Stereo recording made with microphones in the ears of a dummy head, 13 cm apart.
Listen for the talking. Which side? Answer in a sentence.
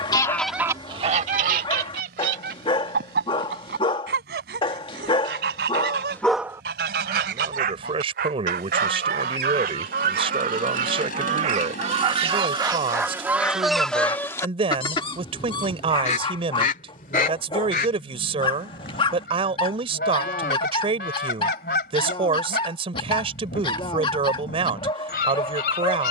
You can hear the talking on the right.